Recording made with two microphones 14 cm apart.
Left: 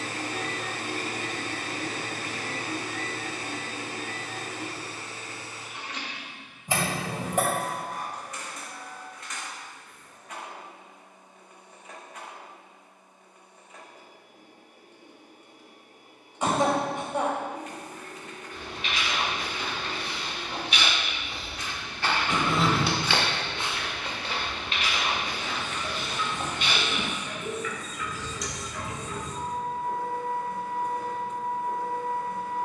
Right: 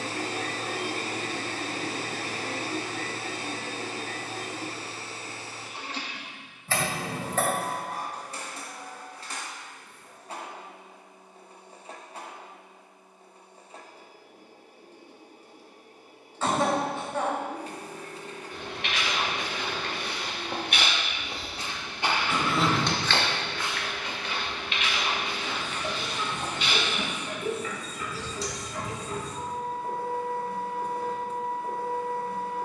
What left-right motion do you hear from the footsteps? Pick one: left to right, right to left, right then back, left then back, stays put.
right to left.